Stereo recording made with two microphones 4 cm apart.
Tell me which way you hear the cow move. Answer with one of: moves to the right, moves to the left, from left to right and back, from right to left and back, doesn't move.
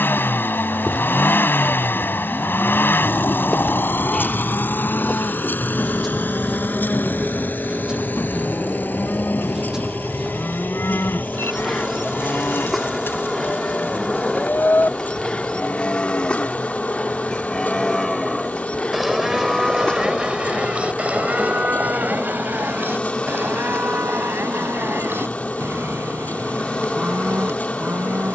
moves to the right.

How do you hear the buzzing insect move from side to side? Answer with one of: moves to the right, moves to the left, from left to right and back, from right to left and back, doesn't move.
from left to right and back.